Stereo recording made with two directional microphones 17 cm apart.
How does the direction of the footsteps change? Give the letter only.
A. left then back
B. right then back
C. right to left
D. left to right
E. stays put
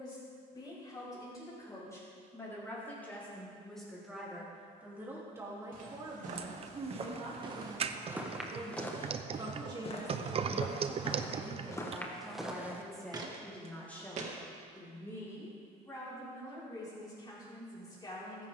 A.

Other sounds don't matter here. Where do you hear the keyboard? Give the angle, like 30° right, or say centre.
40° right.